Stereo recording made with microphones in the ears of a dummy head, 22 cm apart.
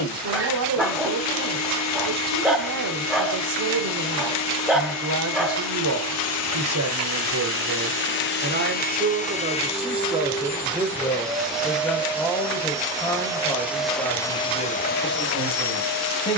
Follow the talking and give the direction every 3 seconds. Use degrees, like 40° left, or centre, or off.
70° right, 70° right, 60° right, 20° right, 10° left, 20° left.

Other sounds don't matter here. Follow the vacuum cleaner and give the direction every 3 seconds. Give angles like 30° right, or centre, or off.
70° left, 70° left, 50° left, 10° left, centre, 60° left.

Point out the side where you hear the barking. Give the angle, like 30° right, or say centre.
centre.